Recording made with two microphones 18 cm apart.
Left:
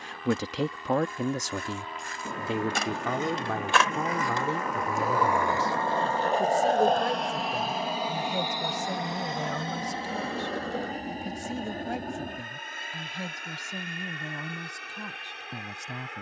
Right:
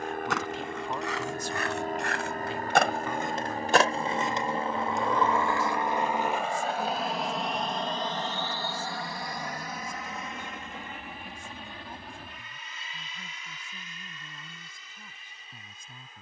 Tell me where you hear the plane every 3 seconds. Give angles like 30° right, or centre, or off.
50° right, 30° right, centre, 30° left, 50° left, 60° left.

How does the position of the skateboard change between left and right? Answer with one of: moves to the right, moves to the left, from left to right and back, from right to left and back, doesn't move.
moves to the left.